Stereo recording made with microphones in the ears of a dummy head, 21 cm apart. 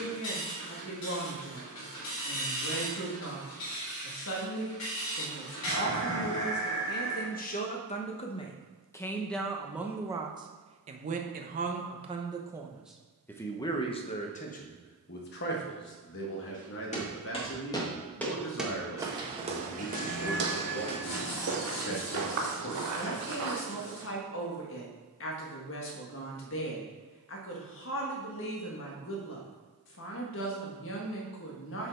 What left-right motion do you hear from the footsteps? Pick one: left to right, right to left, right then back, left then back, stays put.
left to right.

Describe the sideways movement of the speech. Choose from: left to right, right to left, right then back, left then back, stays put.
right then back.